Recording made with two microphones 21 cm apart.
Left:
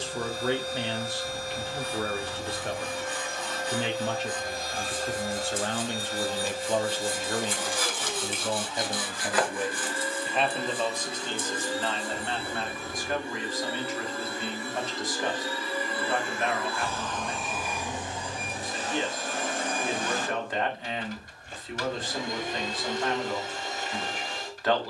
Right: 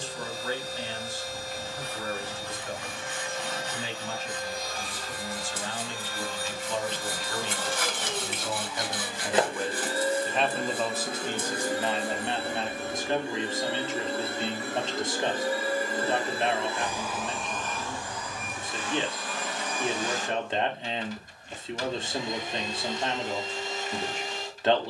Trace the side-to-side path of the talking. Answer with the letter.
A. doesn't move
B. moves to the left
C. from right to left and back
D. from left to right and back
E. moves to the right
E.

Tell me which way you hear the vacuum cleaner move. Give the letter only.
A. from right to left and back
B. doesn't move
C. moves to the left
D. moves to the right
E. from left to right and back
E.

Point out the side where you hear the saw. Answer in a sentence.
In this clip you hear the saw on the right.